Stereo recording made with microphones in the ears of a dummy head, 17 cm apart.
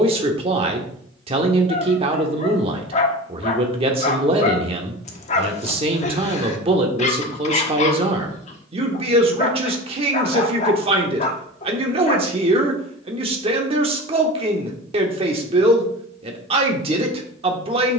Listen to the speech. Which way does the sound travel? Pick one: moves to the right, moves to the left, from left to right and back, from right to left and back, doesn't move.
doesn't move.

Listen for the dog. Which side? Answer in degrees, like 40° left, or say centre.
40° left.